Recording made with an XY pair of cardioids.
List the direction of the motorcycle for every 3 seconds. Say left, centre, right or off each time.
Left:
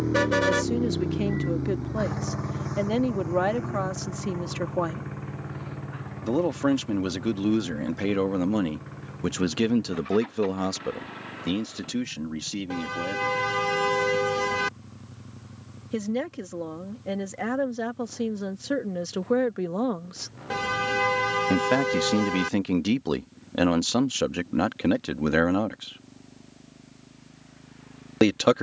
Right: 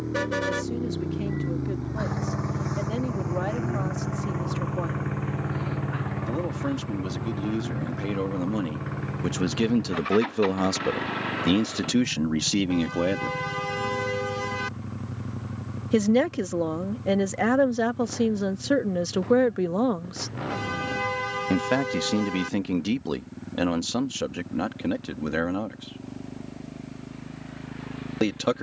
centre, right, right, right, right, right, right, right, right, right.